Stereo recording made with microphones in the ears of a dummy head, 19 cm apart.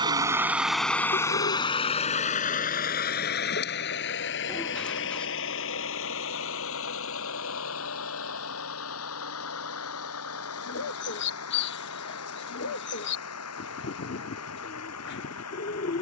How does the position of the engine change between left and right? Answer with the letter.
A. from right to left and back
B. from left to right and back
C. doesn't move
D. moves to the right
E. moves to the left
E.